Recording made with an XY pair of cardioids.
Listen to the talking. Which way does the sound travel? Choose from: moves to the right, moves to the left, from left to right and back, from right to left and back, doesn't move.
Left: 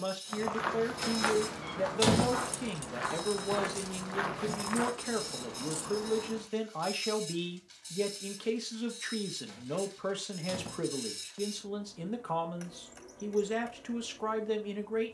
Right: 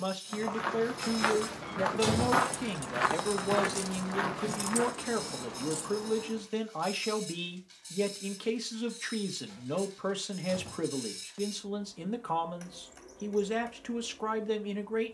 doesn't move.